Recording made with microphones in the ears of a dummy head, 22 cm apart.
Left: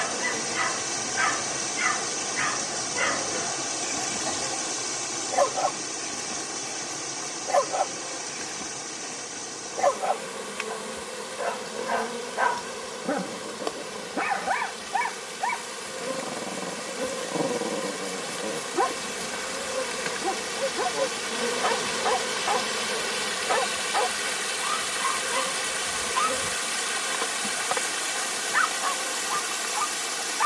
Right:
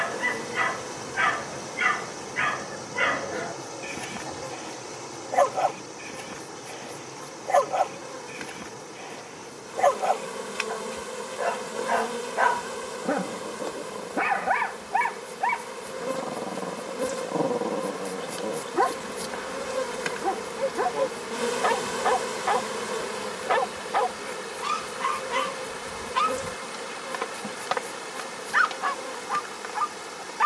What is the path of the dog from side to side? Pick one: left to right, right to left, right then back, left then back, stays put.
stays put.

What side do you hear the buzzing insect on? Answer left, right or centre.
centre.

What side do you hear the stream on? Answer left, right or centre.
left.